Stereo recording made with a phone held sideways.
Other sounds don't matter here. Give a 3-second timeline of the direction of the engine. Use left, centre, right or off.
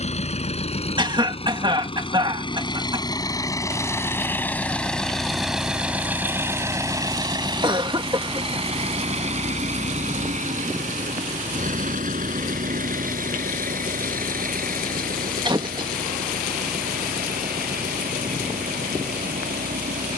left, centre, right, right, right, right, right.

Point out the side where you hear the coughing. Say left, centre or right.
right.